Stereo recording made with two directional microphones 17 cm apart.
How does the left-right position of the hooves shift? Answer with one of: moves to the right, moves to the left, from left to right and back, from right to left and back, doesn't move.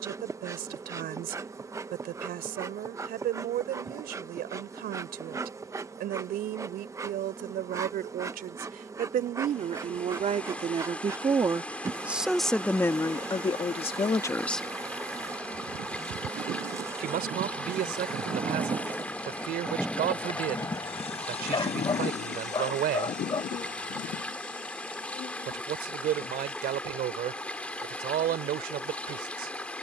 moves to the left.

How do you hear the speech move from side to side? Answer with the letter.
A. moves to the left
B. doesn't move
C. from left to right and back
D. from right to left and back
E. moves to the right
D.